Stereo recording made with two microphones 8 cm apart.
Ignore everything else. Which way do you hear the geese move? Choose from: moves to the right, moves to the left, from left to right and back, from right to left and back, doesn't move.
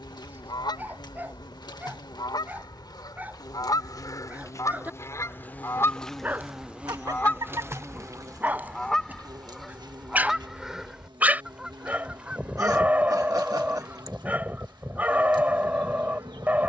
moves to the right.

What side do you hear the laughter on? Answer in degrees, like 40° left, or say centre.
50° right.